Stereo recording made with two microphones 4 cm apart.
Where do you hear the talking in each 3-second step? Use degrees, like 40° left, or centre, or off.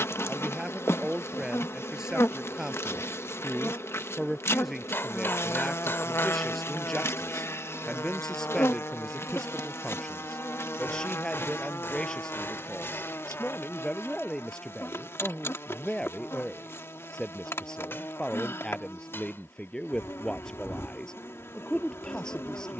10° right, centre, 10° left, 20° left, 20° left, 20° left, 20° left, 20° left.